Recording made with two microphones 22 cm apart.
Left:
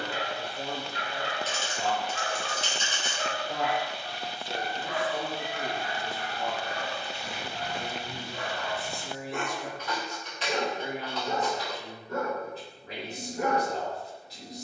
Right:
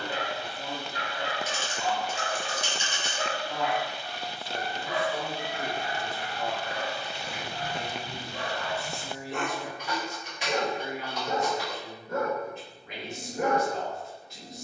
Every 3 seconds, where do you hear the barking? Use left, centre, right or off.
right, centre, right, right, right.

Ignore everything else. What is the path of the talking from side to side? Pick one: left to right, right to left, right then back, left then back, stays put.
right then back.